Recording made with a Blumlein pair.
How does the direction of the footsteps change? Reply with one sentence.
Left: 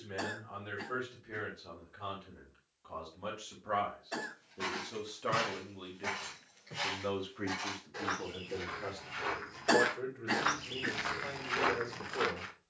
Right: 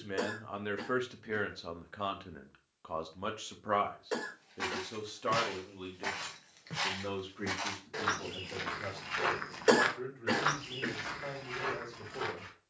You can hear the footsteps move from right to left.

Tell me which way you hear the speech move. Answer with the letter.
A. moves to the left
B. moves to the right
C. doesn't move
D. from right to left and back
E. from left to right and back
A.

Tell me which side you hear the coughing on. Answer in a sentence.
In this clip you hear the coughing on the right.